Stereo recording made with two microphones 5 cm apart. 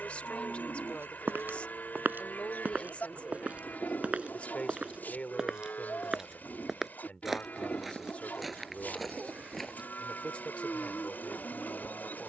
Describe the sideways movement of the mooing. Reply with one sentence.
You can hear the mooing stay in one place.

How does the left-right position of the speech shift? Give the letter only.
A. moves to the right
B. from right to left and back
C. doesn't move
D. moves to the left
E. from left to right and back
C.